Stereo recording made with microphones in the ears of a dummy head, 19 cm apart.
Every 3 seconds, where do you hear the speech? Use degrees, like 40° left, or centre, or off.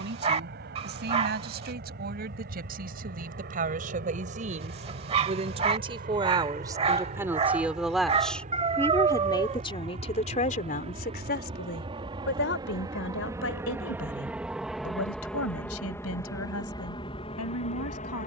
50° right, 30° right, 10° right, 30° left, 70° left, 80° left.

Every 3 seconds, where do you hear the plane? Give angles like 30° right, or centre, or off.
50° right, 50° right, 40° right, 30° right, 10° right, 20° left.